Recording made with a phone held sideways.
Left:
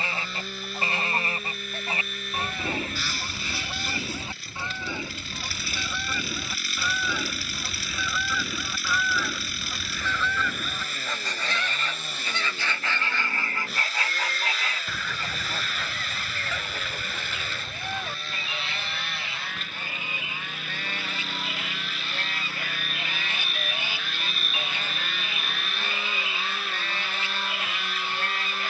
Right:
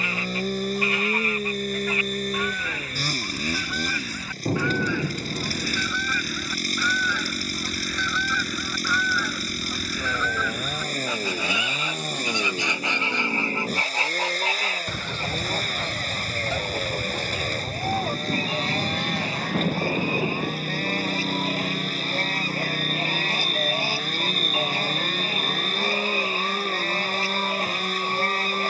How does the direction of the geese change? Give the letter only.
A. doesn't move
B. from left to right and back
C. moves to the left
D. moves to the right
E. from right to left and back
D.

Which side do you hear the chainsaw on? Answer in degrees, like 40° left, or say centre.
40° right.